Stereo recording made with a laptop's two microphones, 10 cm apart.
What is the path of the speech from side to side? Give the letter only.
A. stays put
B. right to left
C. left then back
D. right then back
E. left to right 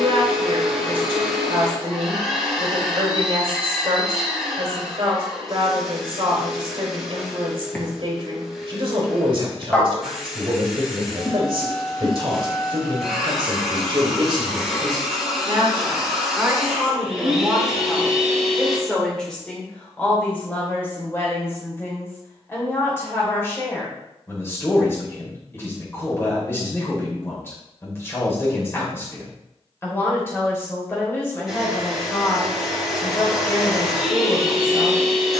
B.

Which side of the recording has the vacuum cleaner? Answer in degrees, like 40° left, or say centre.
10° right.